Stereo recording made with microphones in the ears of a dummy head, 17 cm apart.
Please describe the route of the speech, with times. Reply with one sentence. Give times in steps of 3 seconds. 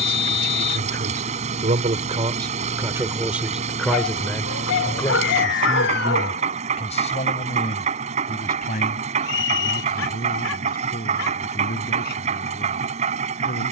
You can hear the speech on the right from 0 s, in the centre from 3 s and on the left from 6 s.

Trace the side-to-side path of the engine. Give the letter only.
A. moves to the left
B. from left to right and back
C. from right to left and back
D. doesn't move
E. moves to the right
D.